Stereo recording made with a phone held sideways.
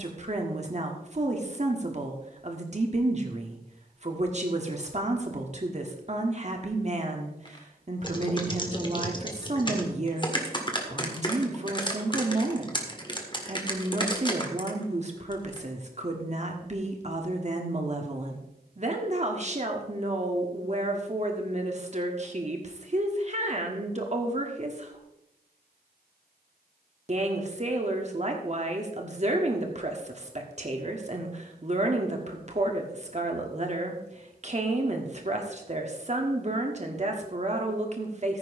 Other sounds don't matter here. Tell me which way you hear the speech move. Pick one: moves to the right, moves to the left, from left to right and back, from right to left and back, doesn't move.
doesn't move.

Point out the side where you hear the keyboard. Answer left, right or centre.
left.